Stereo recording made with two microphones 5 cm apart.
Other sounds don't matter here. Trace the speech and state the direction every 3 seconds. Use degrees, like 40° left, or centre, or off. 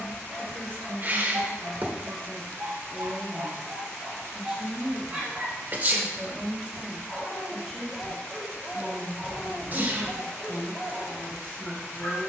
30° left, 10° right, centre, 30° left.